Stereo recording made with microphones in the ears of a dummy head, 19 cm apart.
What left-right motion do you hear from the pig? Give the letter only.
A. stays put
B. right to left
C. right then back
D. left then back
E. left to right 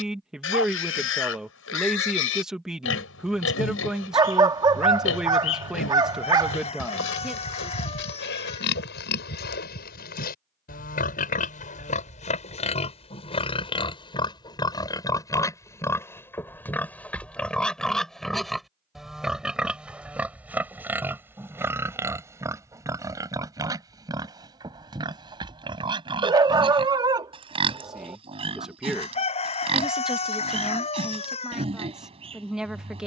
E.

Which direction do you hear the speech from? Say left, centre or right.
centre.